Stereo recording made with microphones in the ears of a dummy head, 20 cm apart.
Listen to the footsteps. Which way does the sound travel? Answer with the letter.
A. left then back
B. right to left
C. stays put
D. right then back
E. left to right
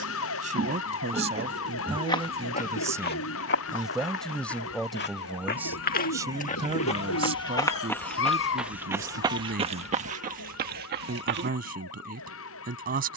A.